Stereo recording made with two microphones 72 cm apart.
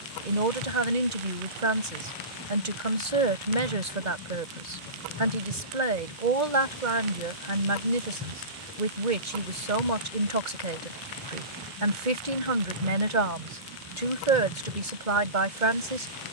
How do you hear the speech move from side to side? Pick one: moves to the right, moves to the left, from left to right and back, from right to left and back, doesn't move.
doesn't move.